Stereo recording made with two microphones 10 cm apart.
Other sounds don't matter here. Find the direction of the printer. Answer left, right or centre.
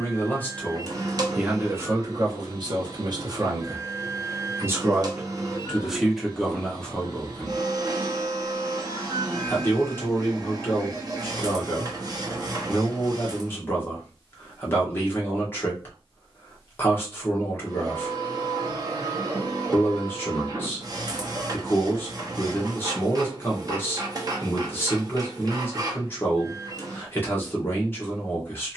right.